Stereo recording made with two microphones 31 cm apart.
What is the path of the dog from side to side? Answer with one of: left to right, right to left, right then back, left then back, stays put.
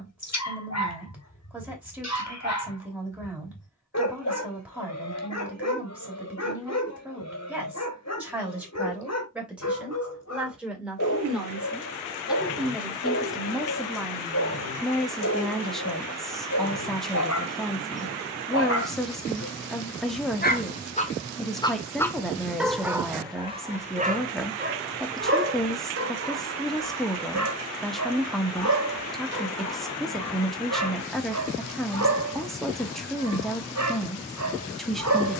left to right.